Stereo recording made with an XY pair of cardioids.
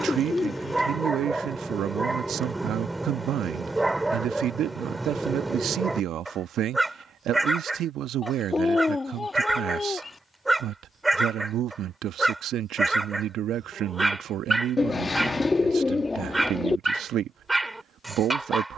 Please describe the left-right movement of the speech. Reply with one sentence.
In this clip you hear the speech stay in one place.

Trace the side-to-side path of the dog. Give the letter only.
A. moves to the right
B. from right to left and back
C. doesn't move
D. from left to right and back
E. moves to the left
C.